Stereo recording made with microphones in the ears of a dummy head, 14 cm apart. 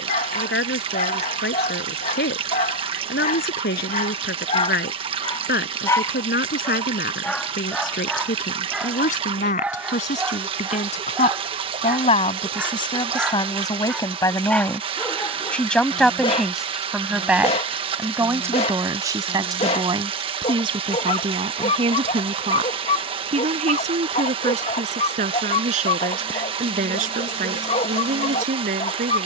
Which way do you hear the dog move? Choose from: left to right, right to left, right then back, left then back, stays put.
right then back.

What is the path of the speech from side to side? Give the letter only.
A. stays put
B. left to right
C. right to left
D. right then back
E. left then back
B.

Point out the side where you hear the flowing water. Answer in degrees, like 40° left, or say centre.
40° right.